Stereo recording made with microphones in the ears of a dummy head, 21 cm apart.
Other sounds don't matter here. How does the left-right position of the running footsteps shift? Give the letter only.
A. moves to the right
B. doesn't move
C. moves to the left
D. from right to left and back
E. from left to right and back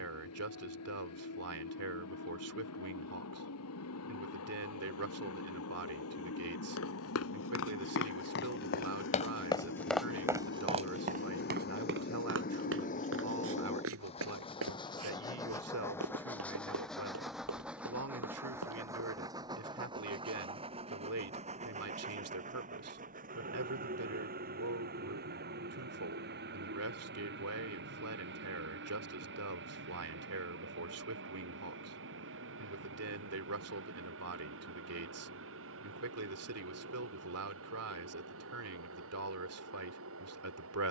A.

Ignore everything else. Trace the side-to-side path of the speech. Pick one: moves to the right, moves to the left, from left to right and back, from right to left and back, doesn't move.
doesn't move.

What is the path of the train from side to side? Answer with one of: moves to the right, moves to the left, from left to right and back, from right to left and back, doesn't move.
moves to the right.